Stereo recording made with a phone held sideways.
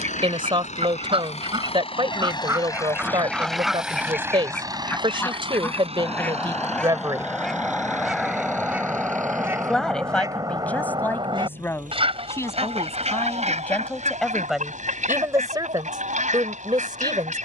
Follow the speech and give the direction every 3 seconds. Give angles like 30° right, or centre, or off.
40° right, 40° right, 30° right, 10° left, 10° left, 30° right.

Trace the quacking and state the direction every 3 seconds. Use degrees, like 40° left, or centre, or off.
40° right, 10° left, centre, 30° right, 60° right, 60° right.